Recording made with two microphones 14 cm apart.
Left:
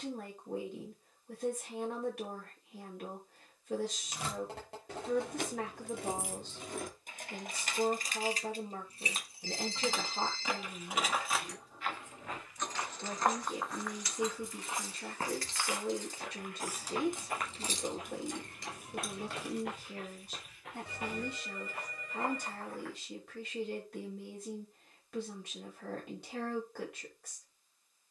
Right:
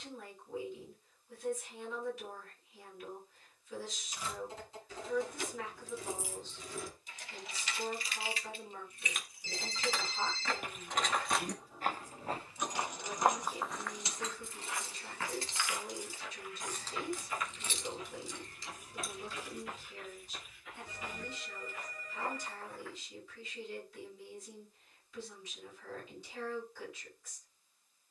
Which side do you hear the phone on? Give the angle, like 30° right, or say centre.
70° left.